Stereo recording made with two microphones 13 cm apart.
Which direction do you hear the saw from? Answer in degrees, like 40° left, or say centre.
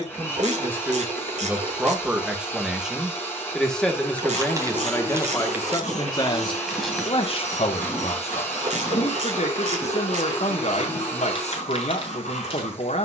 60° left.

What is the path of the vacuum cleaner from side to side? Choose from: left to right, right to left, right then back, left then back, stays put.
stays put.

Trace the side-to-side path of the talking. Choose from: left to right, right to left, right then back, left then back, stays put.
right to left.